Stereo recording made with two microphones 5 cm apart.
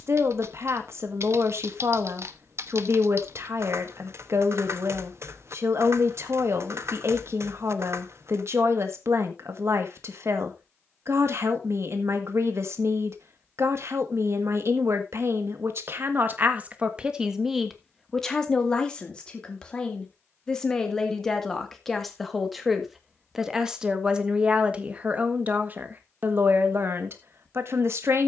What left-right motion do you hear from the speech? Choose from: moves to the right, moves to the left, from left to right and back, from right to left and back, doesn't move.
from right to left and back.